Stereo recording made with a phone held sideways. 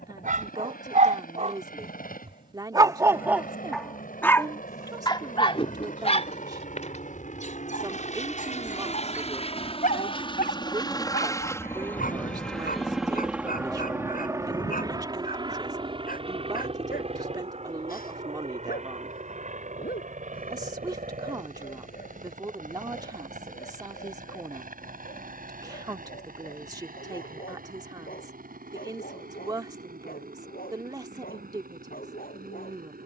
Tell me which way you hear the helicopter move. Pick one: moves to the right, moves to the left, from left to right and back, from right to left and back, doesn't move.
moves to the right.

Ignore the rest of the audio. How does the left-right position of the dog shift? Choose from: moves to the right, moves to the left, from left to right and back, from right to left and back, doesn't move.
moves to the left.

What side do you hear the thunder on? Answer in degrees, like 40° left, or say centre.
60° left.